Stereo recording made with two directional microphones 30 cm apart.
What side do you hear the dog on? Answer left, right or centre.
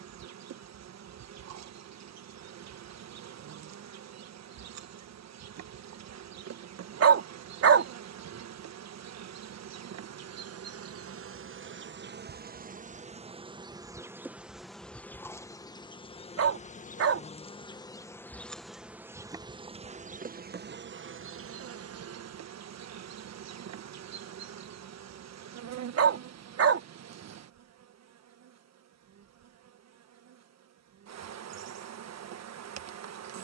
right.